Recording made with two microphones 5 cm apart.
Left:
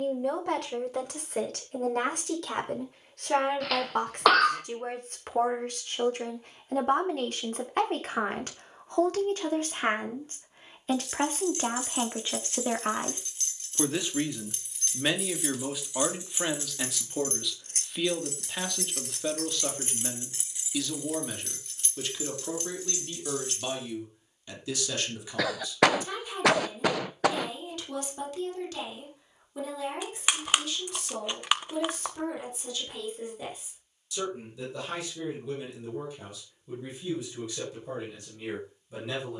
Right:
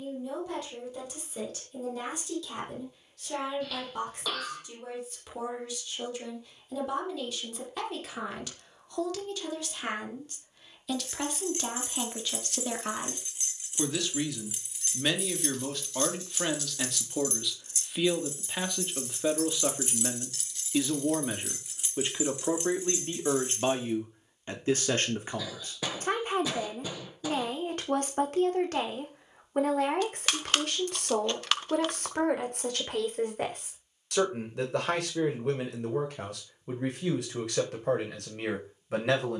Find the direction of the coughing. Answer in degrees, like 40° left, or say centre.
70° left.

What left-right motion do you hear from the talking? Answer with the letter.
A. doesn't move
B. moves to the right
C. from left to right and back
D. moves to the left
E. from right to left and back
B.